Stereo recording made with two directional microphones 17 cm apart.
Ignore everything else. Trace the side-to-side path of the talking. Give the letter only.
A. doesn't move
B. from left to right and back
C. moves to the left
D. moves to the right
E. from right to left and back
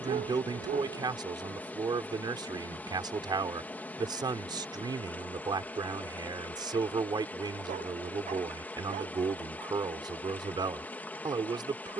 A.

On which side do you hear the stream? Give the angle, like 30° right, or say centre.
10° left.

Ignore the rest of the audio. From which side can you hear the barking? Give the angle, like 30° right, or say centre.
50° right.